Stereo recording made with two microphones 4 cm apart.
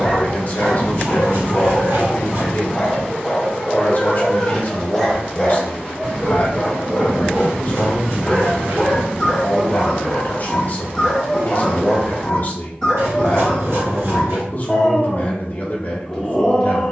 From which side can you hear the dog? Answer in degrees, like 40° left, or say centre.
10° left.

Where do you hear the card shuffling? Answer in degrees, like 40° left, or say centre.
70° right.